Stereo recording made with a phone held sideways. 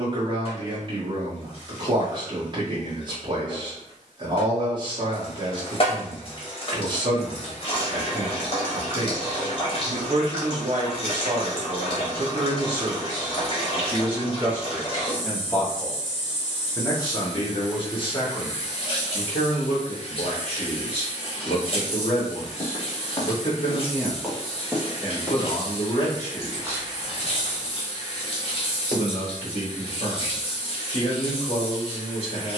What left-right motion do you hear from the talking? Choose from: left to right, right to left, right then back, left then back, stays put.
right to left.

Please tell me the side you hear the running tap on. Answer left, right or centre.
left.